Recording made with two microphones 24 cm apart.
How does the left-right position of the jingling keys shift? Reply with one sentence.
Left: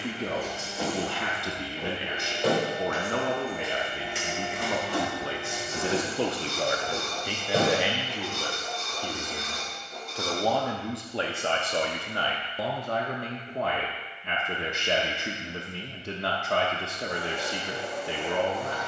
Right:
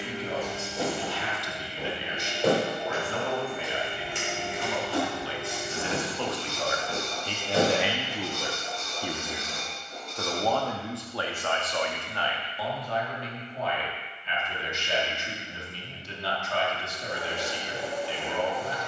In this clip you hear the jingling keys go from the right side to the left.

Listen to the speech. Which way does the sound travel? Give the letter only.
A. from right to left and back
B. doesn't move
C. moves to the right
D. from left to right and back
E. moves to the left
D.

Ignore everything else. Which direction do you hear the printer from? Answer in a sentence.
You can hear the printer on the right.